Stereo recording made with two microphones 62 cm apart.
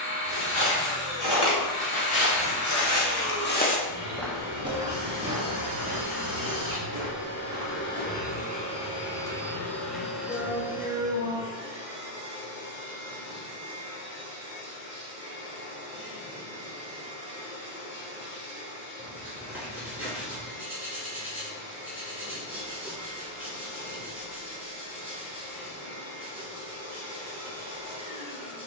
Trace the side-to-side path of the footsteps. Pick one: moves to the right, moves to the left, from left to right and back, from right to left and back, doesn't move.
moves to the right.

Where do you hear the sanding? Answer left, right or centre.
centre.